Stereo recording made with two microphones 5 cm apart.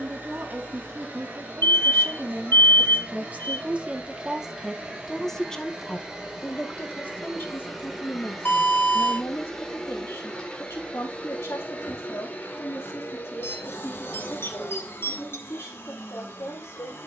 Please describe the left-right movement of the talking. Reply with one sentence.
You can hear the talking move from right to left.